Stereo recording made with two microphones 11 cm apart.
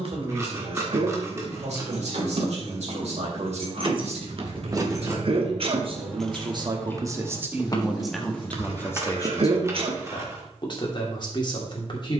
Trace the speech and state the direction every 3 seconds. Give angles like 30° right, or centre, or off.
80° right, 70° right, 20° right, 40° left.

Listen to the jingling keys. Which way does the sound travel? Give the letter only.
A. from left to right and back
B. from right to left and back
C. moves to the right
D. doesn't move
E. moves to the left
E.